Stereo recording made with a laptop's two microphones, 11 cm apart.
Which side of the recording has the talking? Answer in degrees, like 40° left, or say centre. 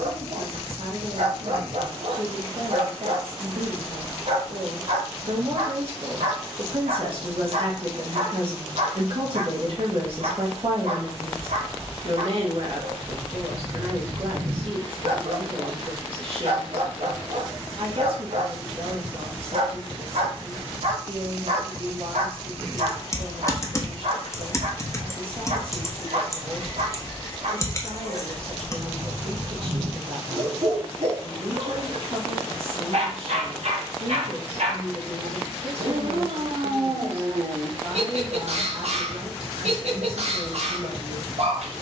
60° right.